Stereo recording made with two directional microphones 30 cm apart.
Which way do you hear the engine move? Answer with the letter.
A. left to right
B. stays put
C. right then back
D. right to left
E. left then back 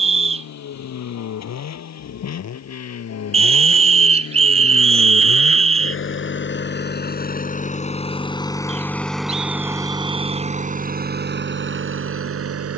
A.